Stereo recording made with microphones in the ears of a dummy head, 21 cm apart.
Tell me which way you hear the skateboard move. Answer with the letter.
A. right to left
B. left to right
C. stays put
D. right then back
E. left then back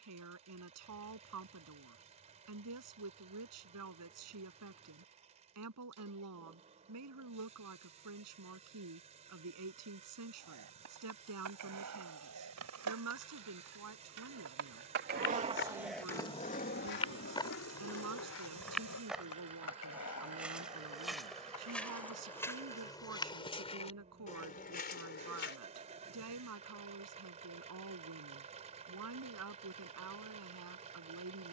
A.